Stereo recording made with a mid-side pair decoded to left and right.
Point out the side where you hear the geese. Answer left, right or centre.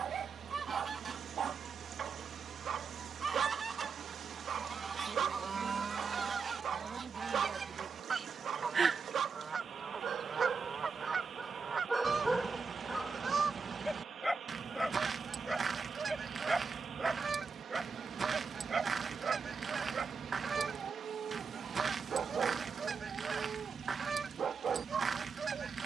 right.